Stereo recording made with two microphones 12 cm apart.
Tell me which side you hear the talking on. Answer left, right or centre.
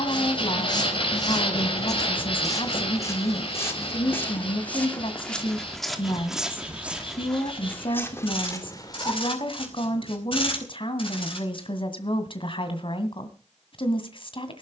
left.